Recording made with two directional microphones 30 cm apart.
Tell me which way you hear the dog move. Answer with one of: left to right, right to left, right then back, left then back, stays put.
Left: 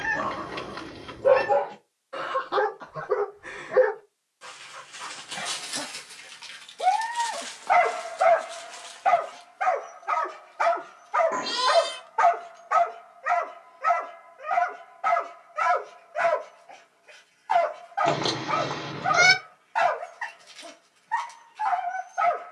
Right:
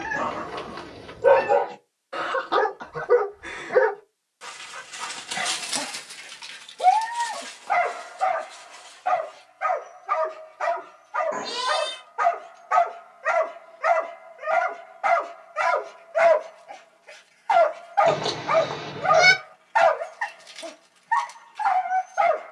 left then back.